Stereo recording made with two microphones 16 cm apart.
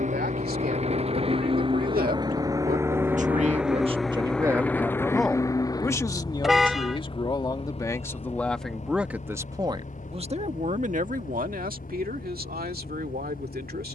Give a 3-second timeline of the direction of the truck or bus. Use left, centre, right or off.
right, centre, left, left, left.